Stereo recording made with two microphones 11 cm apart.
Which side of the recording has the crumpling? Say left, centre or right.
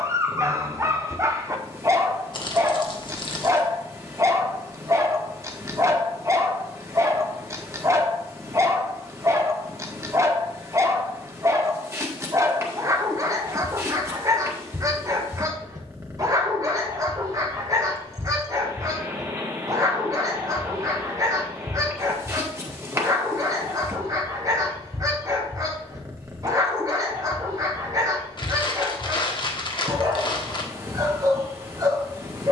left.